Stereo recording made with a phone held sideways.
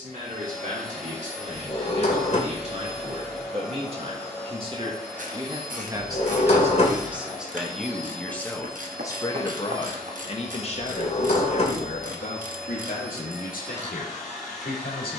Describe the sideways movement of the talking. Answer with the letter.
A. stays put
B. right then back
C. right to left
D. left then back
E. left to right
C.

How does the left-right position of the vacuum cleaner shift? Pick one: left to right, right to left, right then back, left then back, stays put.
stays put.